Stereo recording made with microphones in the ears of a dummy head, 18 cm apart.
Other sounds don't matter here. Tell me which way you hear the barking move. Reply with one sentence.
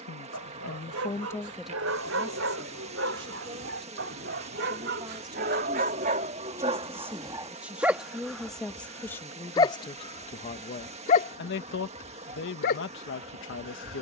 In this clip you hear the barking move to the left.